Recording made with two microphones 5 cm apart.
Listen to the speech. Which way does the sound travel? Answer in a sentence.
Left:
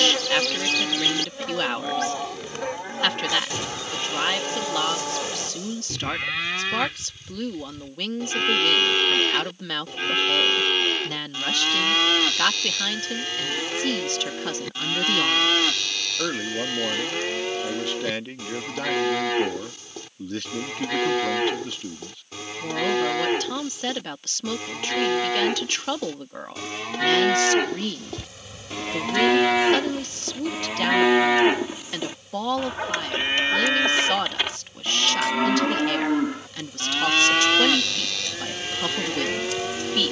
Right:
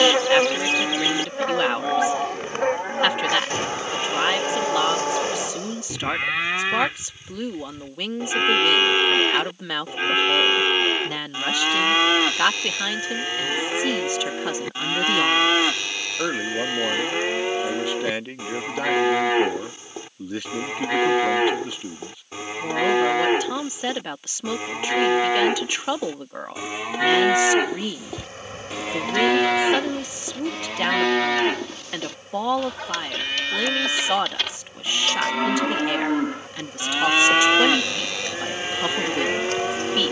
In this clip you hear the speech stay put.